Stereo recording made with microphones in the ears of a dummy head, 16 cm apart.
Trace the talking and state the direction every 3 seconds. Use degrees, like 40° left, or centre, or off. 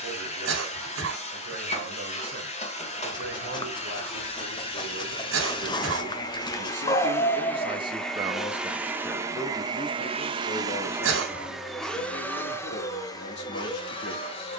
70° right, 60° right, 30° right, 40° left, 70° left.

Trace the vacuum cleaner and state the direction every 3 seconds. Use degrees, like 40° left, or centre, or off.
40° left, 30° left, 10° left, 20° right, 20° left.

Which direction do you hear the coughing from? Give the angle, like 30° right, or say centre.
80° right.